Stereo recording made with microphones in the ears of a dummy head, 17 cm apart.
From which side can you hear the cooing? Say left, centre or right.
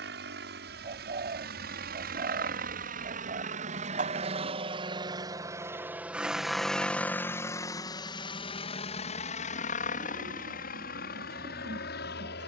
right.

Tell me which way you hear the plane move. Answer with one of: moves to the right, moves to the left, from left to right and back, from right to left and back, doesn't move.
moves to the left.